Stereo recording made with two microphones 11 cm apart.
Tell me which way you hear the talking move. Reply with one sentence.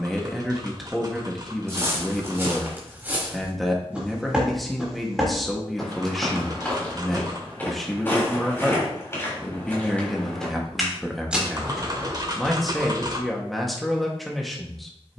In this clip you hear the talking stay in one place.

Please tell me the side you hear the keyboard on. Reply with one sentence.
You can hear the keyboard on the right.